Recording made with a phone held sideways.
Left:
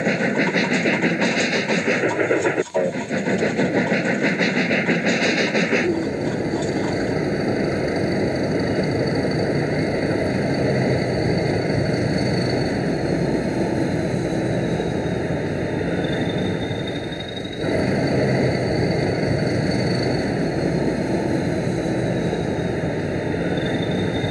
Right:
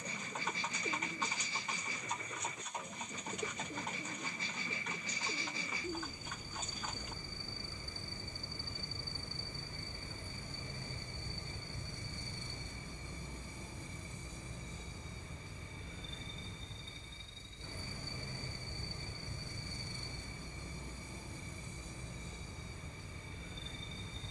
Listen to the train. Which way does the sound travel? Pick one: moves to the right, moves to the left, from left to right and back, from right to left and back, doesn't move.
doesn't move.